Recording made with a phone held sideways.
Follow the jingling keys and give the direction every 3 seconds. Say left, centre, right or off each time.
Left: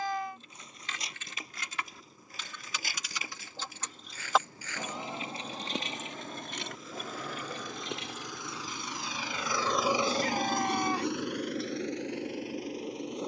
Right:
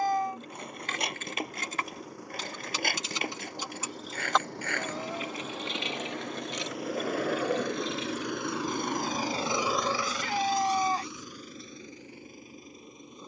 right, centre, left, off, off.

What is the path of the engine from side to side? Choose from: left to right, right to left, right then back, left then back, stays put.
right to left.